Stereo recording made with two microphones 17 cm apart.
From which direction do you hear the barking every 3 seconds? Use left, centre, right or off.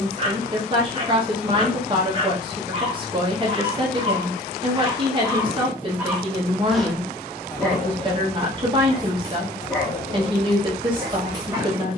right, right, centre, centre.